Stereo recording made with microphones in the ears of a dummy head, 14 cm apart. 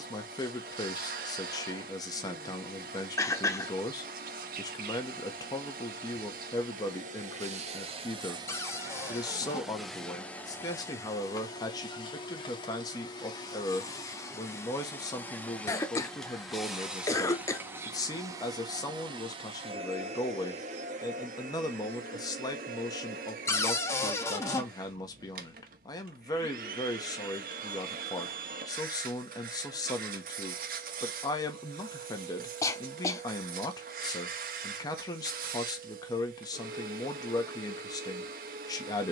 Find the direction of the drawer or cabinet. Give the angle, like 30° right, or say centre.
20° left.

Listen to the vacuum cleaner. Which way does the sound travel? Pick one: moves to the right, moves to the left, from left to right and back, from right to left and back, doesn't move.
from right to left and back.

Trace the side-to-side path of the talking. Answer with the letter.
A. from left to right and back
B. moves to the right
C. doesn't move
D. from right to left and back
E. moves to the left
C.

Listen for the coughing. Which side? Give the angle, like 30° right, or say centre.
20° left.